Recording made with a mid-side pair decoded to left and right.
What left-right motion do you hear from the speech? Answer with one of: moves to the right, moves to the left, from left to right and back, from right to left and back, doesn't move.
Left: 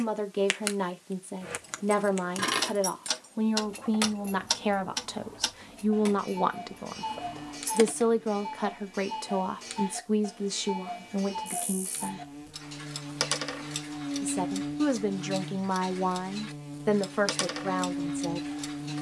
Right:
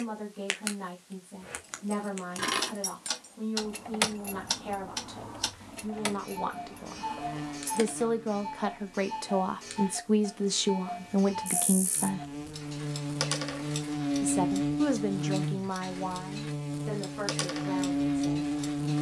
from left to right and back.